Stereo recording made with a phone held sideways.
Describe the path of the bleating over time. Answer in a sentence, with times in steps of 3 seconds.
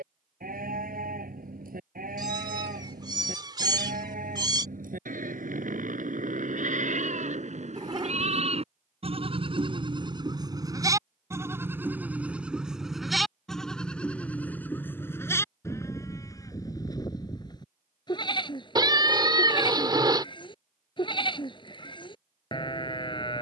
In this clip you hear the bleating on the right from 0 s, in the centre from 12 s and on the left from 15 s.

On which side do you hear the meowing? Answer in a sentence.
You can hear the meowing on the right.